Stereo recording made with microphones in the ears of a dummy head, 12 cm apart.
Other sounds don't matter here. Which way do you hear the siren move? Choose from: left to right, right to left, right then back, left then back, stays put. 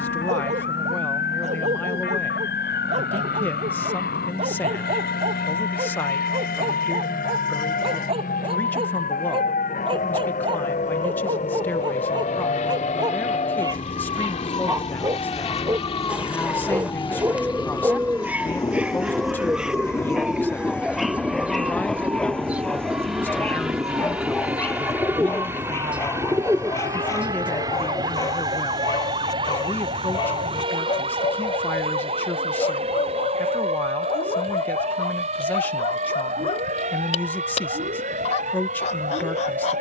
left to right.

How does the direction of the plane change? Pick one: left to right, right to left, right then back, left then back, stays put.
left to right.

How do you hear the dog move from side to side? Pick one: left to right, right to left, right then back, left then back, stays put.
right to left.